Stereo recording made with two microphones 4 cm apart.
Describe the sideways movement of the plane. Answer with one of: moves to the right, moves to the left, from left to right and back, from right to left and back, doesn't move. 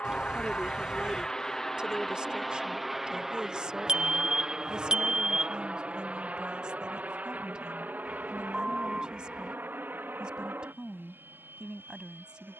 moves to the right.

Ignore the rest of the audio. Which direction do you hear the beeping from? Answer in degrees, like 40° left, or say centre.
20° right.